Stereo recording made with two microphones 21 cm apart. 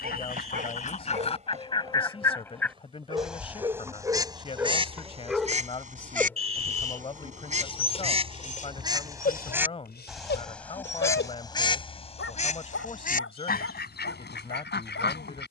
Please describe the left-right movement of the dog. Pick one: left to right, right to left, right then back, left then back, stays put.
right to left.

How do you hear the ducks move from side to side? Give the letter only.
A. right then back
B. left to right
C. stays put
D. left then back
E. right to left
A.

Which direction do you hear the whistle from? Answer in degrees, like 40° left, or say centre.
80° right.